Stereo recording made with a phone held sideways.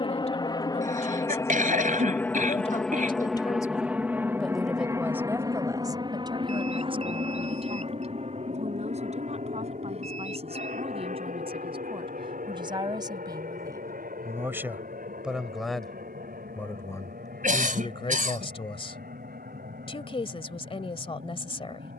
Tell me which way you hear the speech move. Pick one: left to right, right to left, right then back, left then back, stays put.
right then back.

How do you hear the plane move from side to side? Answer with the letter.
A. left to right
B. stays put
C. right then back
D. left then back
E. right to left
A.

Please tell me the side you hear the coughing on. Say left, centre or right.
right.